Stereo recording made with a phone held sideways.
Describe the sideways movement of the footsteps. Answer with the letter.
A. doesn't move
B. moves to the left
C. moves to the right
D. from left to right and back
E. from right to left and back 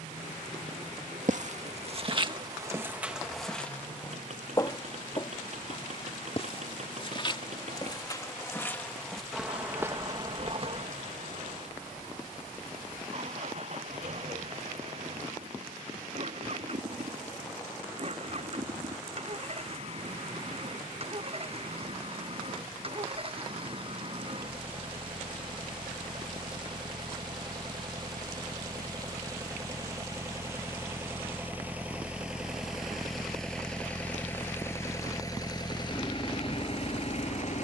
E.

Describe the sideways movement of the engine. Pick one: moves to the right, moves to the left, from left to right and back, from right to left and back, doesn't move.
moves to the left.